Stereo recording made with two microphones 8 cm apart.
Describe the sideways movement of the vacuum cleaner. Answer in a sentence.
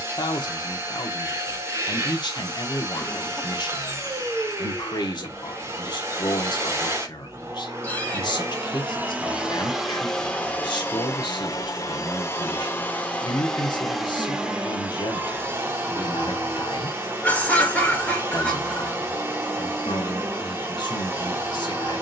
In this clip you hear the vacuum cleaner go left and come back.